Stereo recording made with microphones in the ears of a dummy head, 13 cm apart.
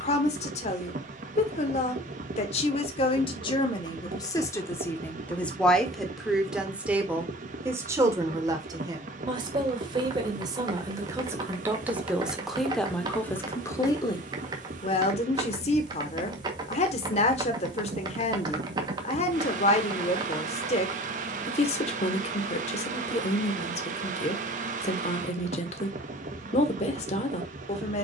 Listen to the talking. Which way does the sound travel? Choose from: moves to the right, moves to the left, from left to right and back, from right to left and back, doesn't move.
from left to right and back.